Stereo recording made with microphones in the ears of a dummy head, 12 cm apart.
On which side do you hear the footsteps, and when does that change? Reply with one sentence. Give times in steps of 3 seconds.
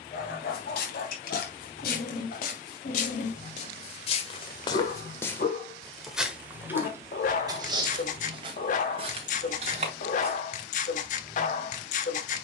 In this clip you hear the footsteps on the left from 0 s and on the right from 6 s.